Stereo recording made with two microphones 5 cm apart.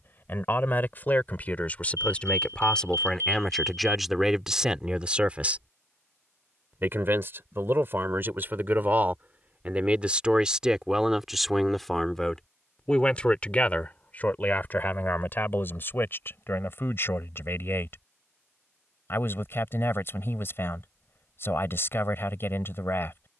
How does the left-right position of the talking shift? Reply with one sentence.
You can hear the talking go right and come back.